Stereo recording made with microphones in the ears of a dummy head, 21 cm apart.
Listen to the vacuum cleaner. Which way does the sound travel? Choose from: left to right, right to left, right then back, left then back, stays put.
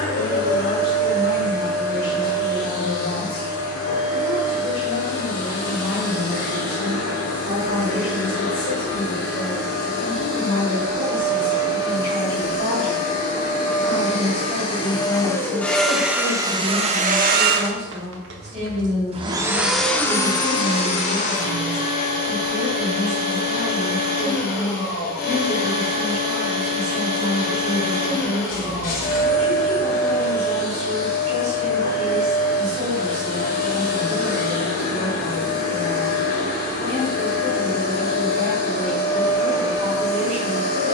right then back.